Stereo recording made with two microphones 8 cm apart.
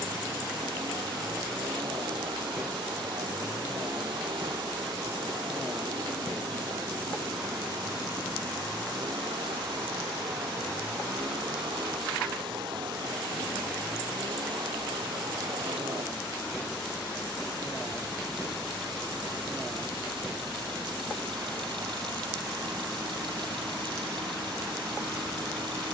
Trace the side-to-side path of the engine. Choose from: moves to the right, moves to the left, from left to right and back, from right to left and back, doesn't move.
doesn't move.